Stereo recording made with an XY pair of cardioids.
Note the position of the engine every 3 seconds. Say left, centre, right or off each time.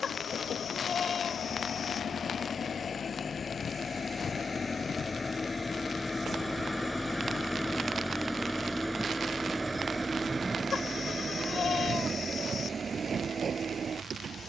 left, left, centre, right, right.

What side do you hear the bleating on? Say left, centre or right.
left.